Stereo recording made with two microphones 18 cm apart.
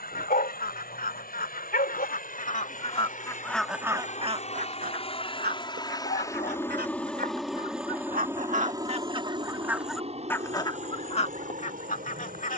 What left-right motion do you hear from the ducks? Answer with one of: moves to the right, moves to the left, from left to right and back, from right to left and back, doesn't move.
from left to right and back.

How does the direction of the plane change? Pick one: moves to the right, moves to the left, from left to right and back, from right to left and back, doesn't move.
moves to the right.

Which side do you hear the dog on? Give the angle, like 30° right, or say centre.
60° left.